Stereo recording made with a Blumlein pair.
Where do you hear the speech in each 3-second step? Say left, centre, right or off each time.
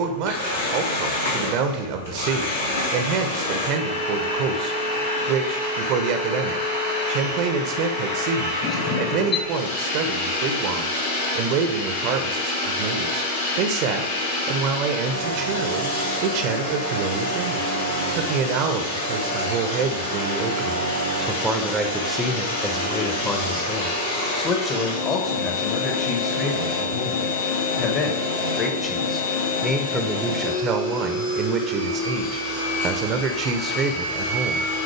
right, right, right, right, right, right, right, centre, left, left, right, right.